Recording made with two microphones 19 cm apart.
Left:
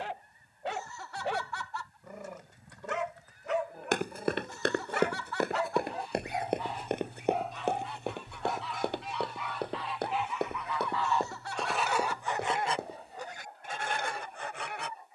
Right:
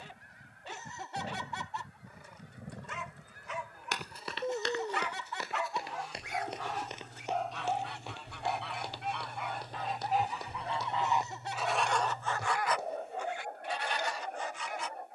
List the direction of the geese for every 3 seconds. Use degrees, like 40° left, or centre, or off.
80° right, 80° right, 60° right, 30° right, 40° left.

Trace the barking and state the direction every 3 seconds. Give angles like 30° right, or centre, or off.
70° left, 50° left, centre, 40° right, 60° right.